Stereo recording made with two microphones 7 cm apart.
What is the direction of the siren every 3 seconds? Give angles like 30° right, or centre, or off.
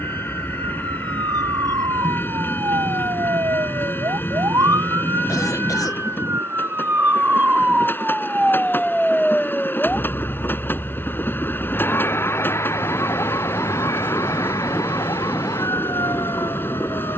70° right, 50° right, 20° right, 20° left, 40° left, 50° left.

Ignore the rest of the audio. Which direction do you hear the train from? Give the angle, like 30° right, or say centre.
30° left.